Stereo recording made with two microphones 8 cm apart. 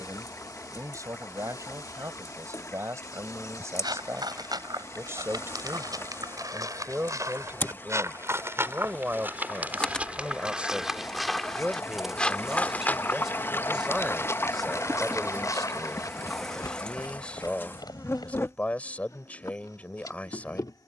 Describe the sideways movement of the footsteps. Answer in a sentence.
In this clip you hear the footsteps move to the left.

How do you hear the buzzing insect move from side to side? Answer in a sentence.
In this clip you hear the buzzing insect move from left to right and back again.